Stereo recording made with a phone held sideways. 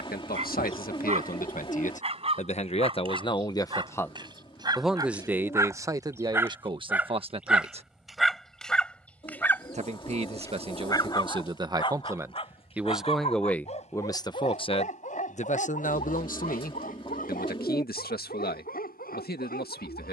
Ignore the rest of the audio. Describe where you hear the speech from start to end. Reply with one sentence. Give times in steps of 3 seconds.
You can hear the speech on the left from 0 s, in the centre from 3 s, on the right from 6 s, in the centre from 12 s and on the left from 15 s.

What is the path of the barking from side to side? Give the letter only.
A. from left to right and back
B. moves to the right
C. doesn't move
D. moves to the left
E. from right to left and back
D.